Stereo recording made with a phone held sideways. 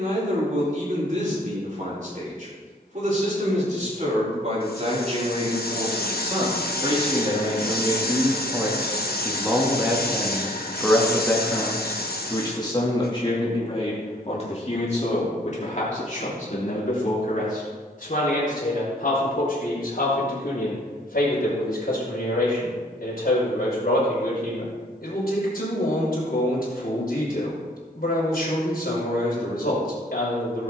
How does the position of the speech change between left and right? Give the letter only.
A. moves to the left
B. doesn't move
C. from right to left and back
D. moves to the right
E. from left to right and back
A.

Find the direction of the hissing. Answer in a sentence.
In this clip you hear the hissing on the left.